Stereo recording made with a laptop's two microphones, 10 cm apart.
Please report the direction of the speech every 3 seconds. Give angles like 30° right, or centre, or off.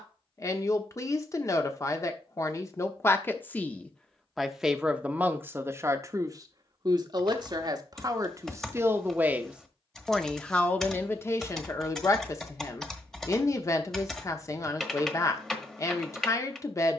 30° left, centre, 40° right, 10° left, 30° left, 30° left.